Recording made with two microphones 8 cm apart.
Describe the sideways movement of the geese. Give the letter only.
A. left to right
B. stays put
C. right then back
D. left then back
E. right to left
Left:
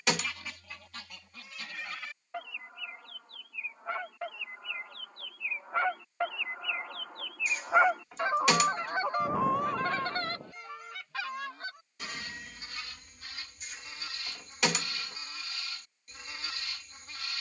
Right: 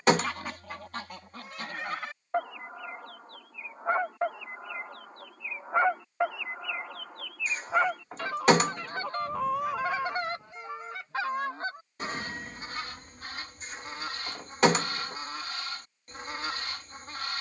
D.